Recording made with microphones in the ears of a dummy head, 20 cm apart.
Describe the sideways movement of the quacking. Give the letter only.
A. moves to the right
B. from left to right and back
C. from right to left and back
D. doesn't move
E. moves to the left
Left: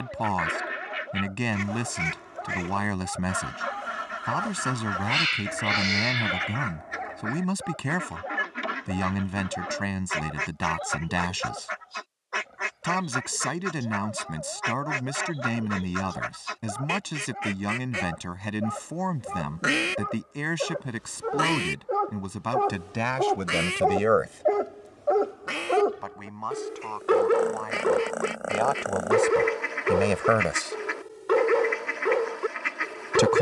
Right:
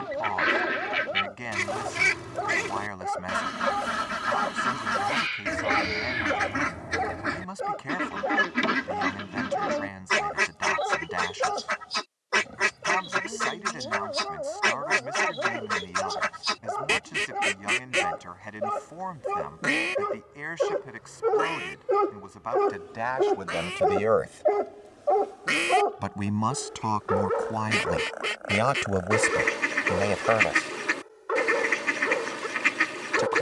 C.